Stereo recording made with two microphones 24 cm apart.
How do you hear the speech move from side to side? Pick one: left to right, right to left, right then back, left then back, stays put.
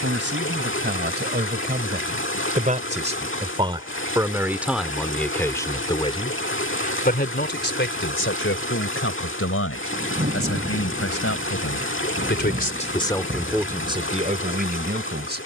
left then back.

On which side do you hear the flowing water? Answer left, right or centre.
left.